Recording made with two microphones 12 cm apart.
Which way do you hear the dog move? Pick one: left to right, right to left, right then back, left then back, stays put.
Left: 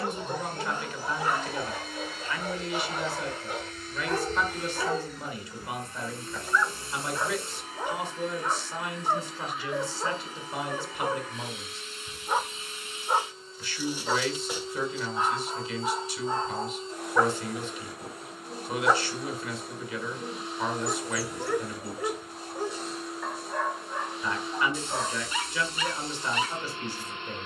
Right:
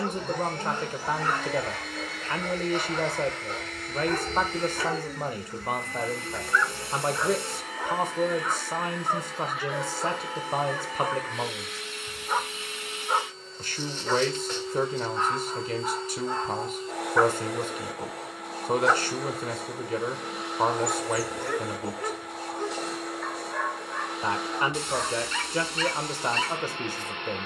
stays put.